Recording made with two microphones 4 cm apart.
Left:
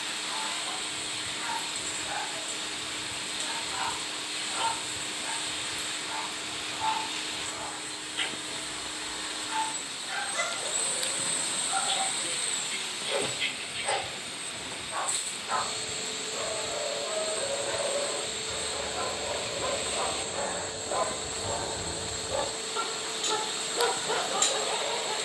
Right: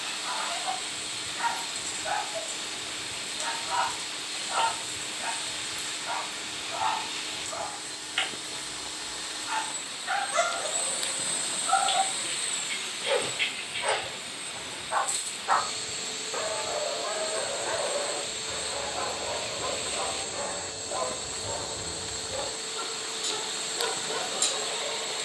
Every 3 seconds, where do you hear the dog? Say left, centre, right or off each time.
right, right, right, right, right, right, centre, left, left.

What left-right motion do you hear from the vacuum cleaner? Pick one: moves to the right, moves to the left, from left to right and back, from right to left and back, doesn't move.
doesn't move.